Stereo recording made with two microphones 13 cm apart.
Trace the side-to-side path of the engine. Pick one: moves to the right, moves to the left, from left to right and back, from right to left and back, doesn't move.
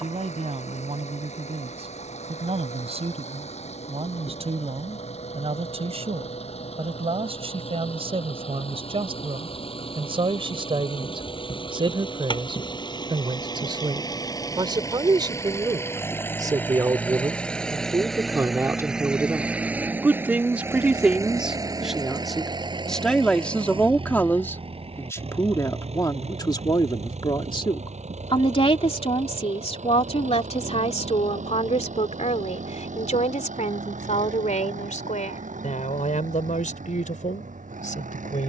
moves to the right.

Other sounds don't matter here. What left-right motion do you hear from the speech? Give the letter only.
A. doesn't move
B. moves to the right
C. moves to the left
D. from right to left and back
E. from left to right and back
C.